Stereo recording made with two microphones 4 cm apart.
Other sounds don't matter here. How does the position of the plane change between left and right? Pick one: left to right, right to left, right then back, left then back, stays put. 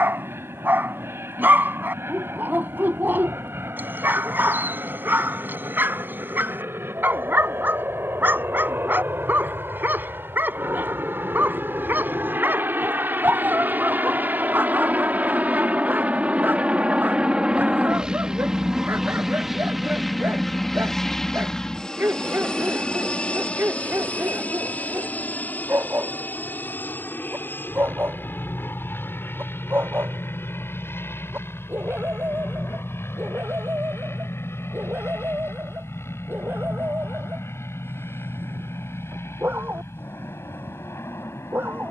right to left.